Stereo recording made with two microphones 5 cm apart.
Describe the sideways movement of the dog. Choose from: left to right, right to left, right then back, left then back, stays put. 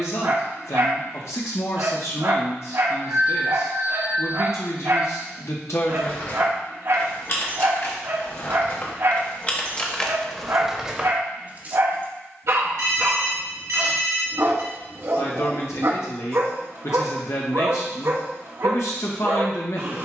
stays put.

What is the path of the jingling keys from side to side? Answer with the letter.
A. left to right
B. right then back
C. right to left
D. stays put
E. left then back
A.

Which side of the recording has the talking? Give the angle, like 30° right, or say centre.
70° left.